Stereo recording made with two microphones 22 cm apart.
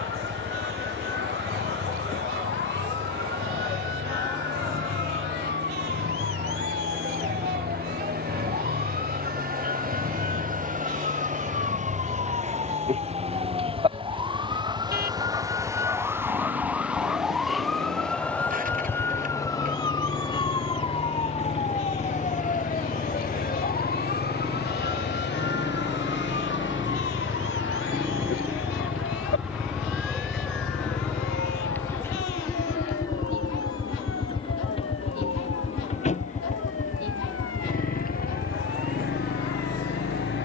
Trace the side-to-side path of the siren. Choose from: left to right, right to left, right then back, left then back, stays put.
right to left.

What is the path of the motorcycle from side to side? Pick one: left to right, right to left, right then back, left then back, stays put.
right to left.